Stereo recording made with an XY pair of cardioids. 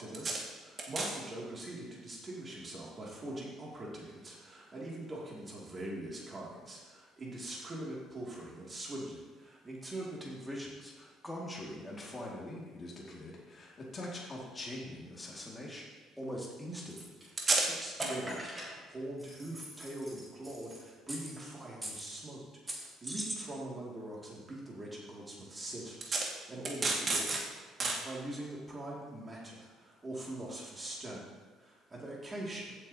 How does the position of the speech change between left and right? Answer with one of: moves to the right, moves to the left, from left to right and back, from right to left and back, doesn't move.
from right to left and back.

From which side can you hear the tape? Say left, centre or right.
right.